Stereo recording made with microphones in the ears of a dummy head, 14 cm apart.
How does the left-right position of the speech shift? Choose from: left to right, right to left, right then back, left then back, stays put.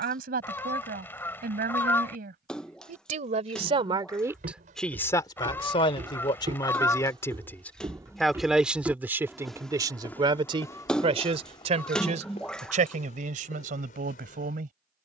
left then back.